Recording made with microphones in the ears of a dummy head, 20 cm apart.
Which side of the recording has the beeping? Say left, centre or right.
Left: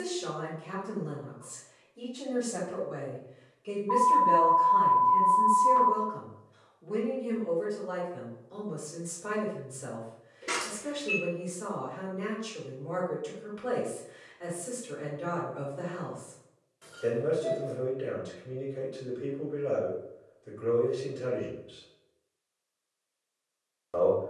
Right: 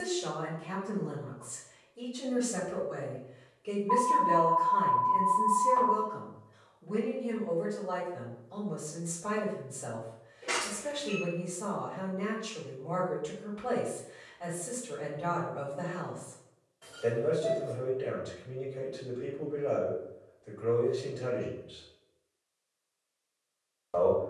left.